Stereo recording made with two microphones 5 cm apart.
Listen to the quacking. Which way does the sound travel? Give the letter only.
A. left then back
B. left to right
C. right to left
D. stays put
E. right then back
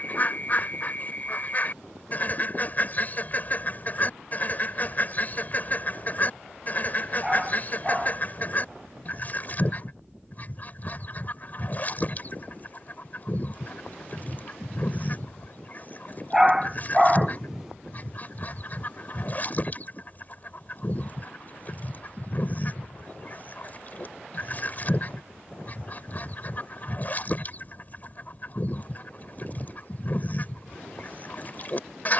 D.